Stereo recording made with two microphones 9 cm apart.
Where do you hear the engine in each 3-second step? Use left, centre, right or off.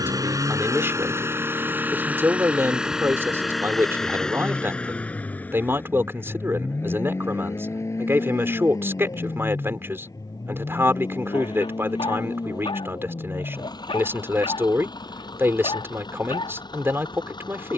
right, centre, left, left, left, left.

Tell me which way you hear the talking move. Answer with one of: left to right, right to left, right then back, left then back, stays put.
stays put.